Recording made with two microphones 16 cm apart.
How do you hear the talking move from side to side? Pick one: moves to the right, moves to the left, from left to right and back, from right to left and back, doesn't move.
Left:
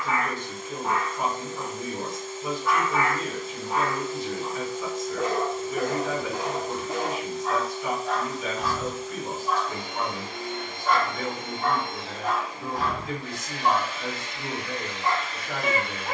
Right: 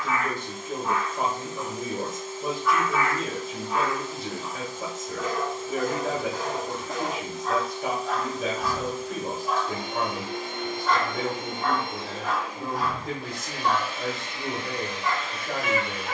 doesn't move.